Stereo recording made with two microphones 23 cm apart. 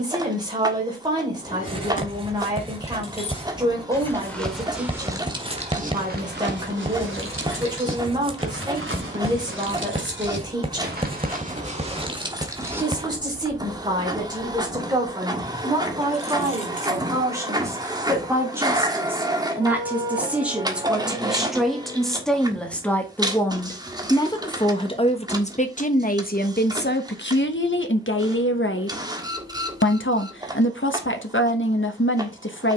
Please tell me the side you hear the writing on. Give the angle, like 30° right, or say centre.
20° right.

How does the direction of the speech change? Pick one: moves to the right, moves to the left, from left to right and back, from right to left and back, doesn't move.
moves to the left.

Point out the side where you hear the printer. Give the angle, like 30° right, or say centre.
20° right.